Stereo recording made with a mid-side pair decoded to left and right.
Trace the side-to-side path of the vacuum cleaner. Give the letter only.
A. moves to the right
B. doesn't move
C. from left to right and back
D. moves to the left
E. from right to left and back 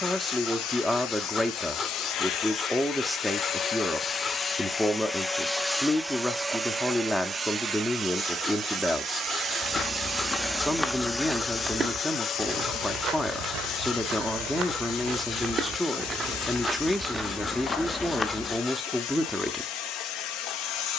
C.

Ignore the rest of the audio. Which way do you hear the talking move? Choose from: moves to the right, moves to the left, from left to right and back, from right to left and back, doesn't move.
doesn't move.